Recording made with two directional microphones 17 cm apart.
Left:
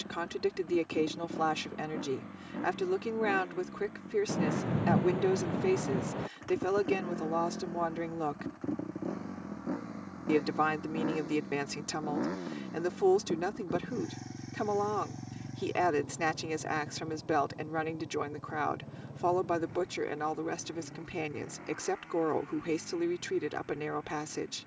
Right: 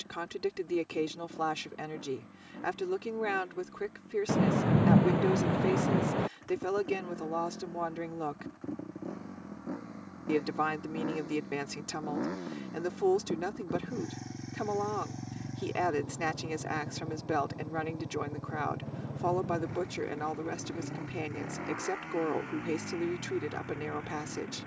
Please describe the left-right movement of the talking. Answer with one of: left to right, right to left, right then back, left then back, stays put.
stays put.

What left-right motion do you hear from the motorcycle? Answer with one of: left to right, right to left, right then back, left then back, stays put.
left to right.